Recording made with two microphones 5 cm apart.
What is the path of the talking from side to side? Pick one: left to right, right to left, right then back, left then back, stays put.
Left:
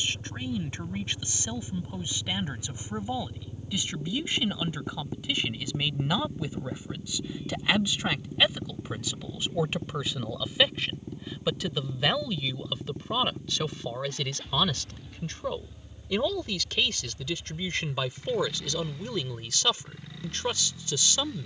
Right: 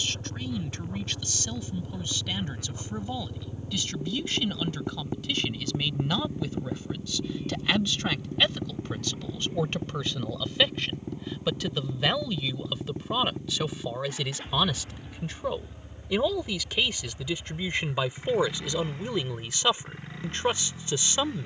left to right.